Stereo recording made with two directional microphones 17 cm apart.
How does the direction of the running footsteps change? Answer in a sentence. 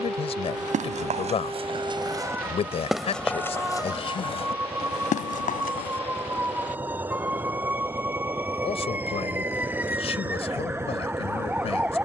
In this clip you hear the running footsteps travel towards the left.